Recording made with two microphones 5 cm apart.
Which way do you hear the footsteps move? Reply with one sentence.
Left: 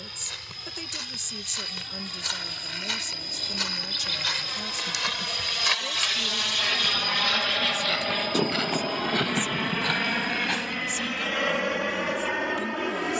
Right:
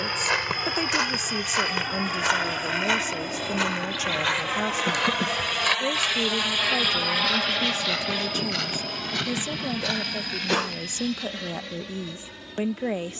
In this clip you hear the footsteps travel towards the left.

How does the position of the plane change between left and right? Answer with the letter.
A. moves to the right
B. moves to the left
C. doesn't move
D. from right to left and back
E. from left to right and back
B.